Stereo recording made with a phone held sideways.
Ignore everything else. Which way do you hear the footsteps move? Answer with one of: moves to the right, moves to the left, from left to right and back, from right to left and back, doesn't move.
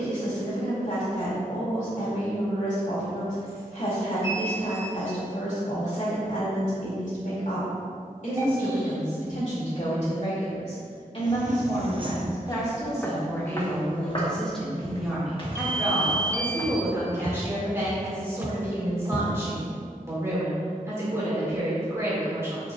from right to left and back.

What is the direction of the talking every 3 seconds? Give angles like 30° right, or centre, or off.
60° left, 60° left, 60° left, 50° left, 10° left, 10° right, 20° right, 20° right.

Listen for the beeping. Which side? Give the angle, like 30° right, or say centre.
20° right.